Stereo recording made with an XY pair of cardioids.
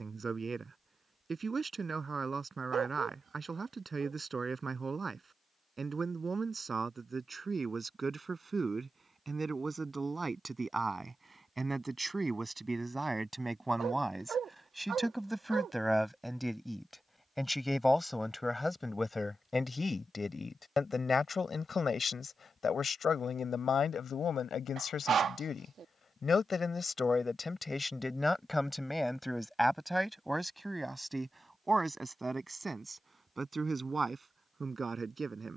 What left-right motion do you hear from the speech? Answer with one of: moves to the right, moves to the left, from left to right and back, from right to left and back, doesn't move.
from right to left and back.